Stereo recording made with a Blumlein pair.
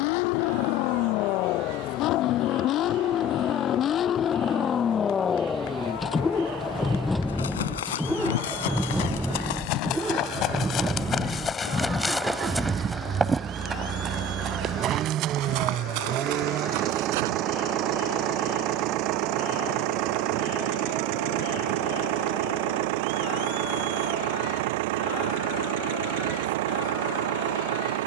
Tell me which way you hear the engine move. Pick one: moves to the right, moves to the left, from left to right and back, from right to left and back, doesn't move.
moves to the right.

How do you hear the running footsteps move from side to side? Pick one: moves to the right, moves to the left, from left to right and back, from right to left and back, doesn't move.
moves to the right.